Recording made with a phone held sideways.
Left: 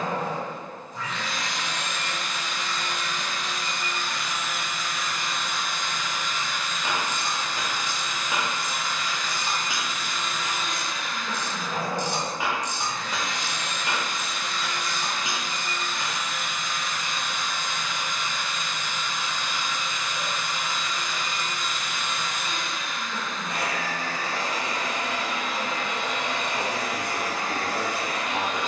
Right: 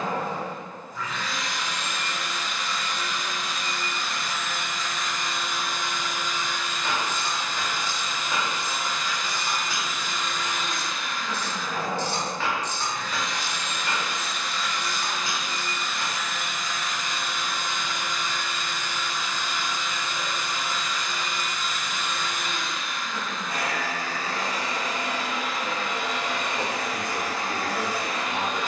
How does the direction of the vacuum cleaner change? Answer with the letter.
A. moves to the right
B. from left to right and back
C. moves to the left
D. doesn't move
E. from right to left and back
B.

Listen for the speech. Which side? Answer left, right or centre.
left.